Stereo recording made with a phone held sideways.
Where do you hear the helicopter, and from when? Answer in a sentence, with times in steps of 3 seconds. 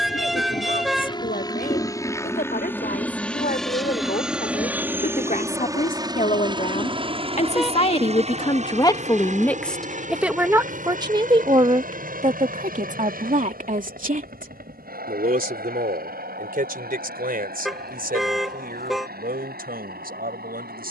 In this clip you hear the helicopter on the left from 0 s, in the centre from 3 s and on the right from 6 s.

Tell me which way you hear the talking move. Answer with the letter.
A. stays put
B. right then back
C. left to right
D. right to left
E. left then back
C.